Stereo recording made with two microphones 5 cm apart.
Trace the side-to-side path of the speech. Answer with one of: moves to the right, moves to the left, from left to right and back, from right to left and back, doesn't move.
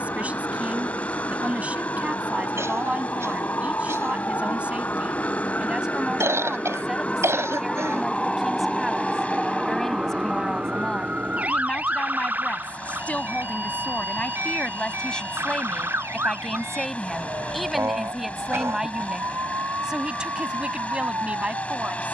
from right to left and back.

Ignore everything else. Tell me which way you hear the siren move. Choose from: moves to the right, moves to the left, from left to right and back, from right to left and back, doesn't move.
moves to the right.